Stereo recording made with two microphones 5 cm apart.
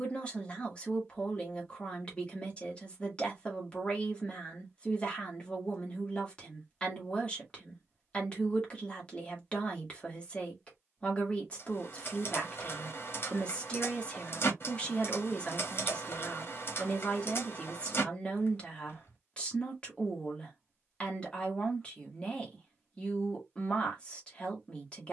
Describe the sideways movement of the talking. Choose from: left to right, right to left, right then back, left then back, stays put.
stays put.